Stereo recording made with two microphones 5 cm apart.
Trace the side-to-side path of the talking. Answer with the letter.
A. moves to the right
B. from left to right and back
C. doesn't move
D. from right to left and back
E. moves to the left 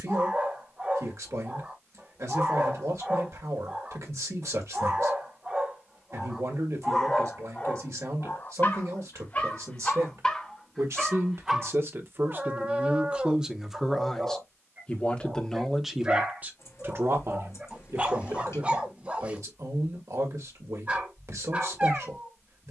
D.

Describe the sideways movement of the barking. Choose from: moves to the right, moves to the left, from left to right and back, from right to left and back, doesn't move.
from right to left and back.